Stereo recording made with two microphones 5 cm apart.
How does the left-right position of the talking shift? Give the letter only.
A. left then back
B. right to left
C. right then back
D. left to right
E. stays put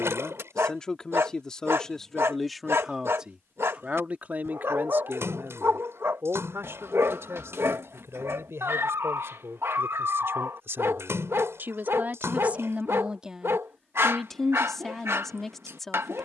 C.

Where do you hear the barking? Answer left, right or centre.
right.